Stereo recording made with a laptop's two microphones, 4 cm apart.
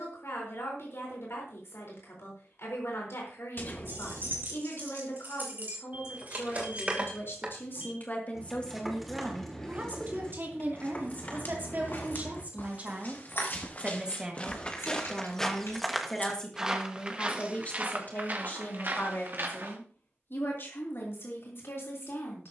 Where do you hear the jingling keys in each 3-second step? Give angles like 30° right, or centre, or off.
off, 50° right, 20° right, 30° left, 60° left, 70° left, off, off.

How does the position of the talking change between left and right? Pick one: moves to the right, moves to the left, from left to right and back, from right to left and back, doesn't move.
from left to right and back.